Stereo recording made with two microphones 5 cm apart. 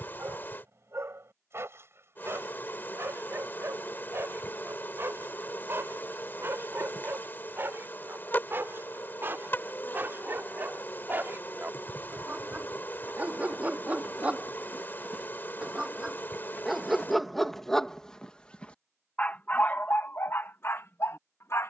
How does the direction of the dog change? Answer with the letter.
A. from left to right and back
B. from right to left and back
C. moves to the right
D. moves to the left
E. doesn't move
D.